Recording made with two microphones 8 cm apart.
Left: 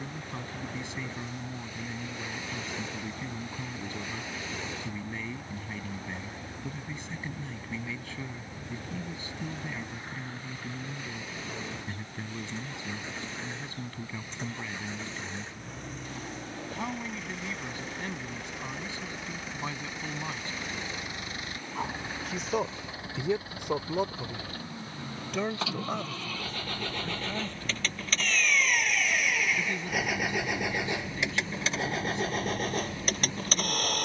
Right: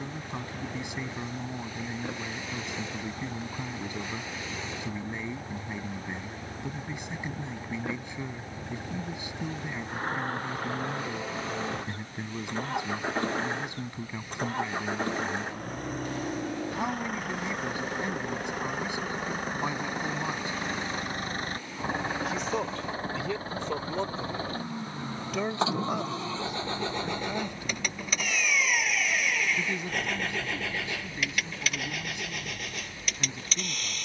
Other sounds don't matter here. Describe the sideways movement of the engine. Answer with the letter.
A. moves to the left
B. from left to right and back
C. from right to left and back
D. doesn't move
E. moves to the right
A.